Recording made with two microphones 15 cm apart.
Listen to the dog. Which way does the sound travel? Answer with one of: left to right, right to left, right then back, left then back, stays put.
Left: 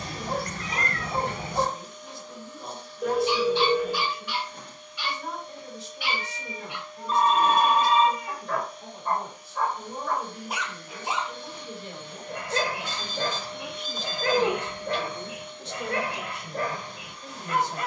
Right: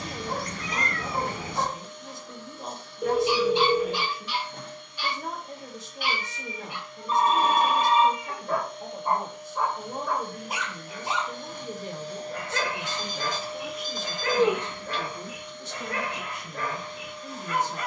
right then back.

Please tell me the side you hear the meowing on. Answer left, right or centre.
left.